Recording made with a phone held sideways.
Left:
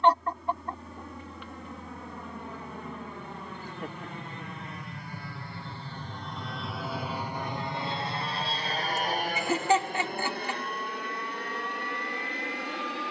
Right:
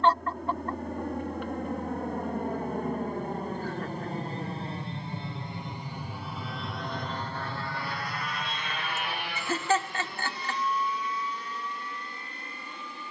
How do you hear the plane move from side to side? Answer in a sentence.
In this clip you hear the plane go from the right side to the left.